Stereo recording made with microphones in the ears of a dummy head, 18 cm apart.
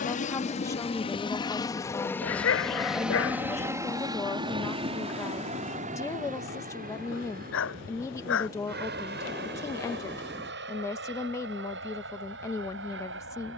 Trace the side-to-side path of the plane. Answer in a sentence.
You can hear the plane move from left to right.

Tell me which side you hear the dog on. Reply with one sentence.
In this clip you hear the dog on the left.